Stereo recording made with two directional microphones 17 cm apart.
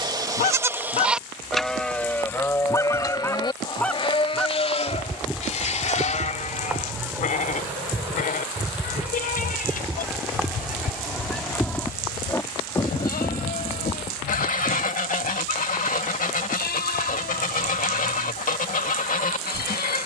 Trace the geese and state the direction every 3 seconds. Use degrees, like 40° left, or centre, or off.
30° left, centre, 10° right, centre, 40° left, 50° left, 50° left.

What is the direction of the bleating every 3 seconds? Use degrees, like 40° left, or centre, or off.
centre, 30° left, 50° left, 60° left, 60° left, 60° left, 70° left.